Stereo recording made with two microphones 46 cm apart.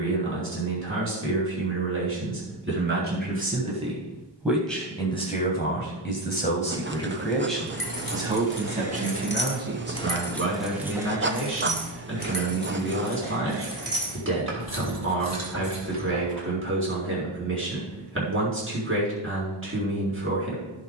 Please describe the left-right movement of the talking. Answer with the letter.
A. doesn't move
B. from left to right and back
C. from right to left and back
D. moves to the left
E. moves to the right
C.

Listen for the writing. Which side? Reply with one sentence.
You can hear the writing on the right.